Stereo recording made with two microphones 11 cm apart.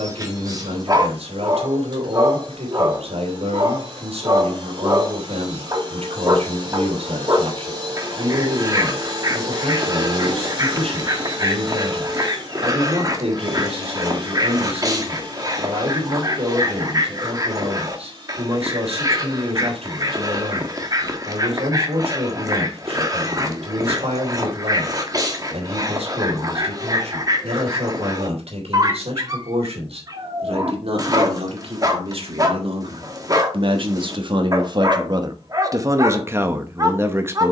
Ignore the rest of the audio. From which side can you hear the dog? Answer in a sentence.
You can hear the dog on the right.